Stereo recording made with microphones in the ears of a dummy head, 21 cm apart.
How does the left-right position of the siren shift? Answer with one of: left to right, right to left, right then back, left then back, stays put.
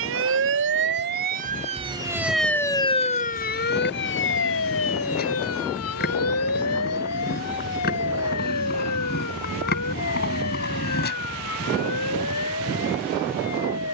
right to left.